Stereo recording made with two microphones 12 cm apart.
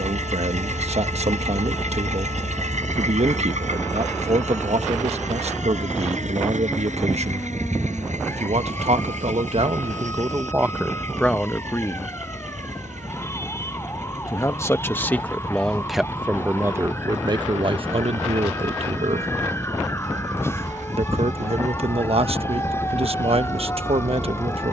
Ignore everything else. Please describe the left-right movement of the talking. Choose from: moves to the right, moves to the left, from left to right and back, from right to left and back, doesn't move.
from right to left and back.